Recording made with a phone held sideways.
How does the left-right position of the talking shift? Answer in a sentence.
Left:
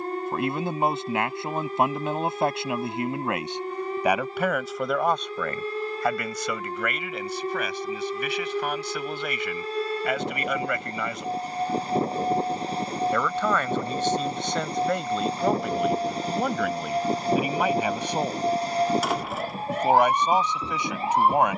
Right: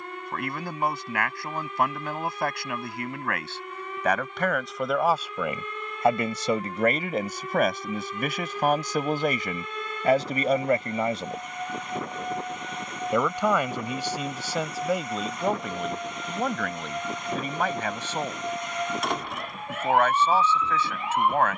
In this clip you hear the talking go right and come back.